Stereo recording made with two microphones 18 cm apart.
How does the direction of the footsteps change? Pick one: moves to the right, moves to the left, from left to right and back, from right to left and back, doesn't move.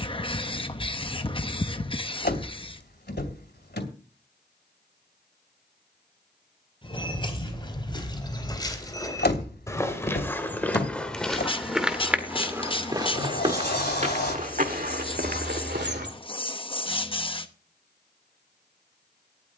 moves to the right.